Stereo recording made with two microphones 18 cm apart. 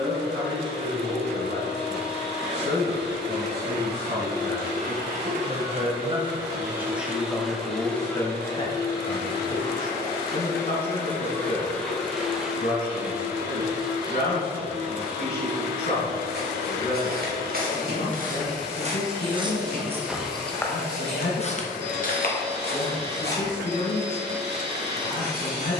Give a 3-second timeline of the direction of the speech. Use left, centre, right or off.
right, right, centre, left, left, left, left, left, left.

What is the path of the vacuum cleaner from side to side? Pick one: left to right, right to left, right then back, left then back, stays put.
left then back.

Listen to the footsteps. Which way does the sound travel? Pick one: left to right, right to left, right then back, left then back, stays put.
right to left.